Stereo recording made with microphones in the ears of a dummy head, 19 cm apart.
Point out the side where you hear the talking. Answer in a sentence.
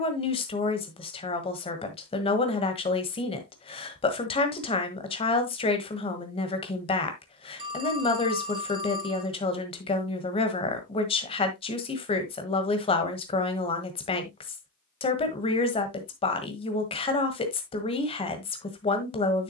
You can hear the talking on the left.